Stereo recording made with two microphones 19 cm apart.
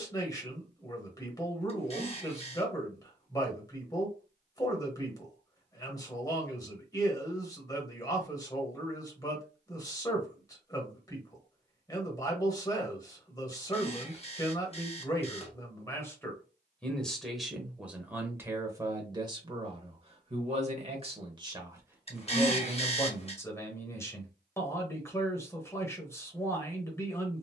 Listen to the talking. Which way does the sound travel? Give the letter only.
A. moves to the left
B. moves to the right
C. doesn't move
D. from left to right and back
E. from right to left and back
D.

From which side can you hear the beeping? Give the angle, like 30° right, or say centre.
30° left.